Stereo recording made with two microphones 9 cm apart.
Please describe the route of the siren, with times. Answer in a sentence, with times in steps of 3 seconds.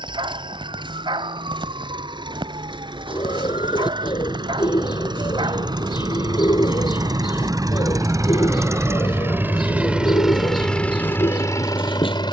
You can hear the siren on the right from 0 s and on the left from 9 s.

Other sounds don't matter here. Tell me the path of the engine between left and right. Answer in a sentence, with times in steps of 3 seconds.
You can hear the engine on the right from 0 s and in the centre from 9 s.